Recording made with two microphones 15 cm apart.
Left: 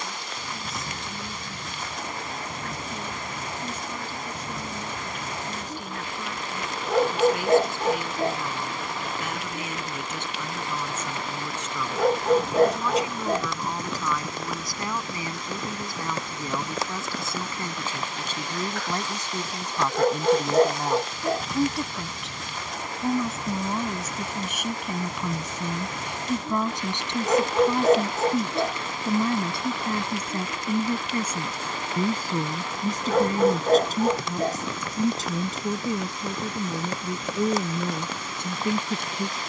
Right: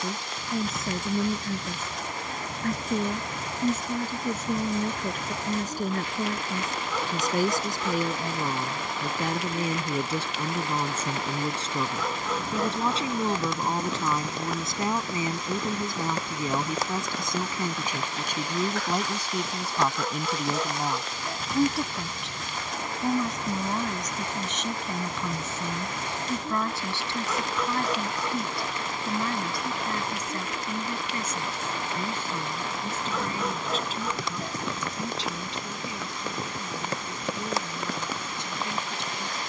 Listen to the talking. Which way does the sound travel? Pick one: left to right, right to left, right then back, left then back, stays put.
right to left.